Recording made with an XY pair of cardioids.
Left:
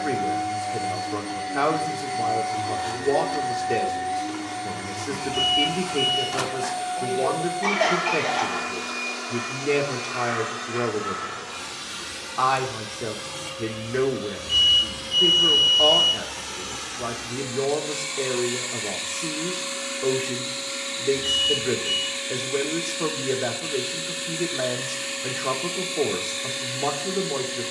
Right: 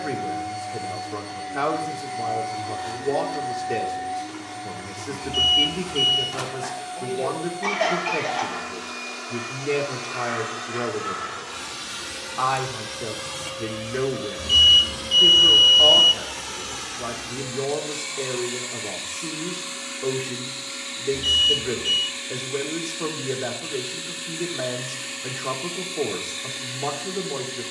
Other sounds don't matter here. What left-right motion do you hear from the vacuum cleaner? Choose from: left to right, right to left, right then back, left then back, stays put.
right then back.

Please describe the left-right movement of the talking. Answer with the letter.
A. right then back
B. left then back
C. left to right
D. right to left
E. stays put
E.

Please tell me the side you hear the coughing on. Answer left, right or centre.
centre.